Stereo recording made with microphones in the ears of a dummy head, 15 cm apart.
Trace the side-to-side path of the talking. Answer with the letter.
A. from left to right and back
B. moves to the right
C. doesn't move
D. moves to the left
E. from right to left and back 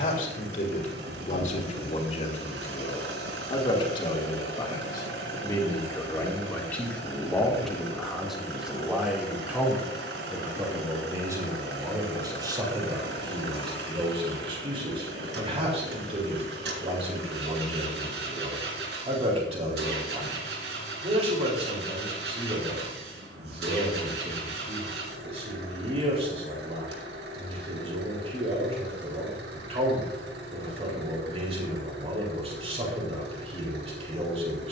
B.